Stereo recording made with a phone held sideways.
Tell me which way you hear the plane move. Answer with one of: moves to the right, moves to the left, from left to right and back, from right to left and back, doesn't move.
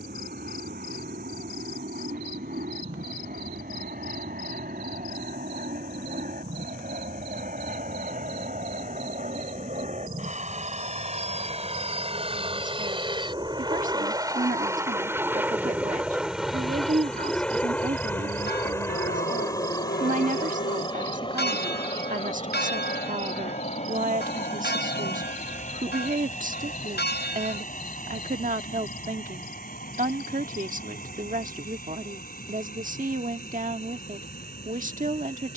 moves to the left.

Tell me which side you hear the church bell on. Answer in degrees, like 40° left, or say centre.
80° left.